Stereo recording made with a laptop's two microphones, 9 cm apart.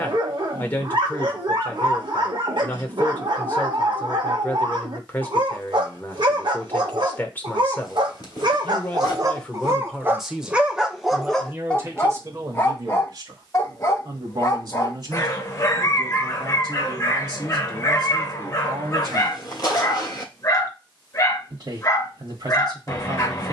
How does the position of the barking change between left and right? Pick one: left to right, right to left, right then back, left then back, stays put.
right to left.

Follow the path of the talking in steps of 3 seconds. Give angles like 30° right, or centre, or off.
20° left, 20° left, 20° left, 10° right, 40° right, 50° right, 50° right, 50° right.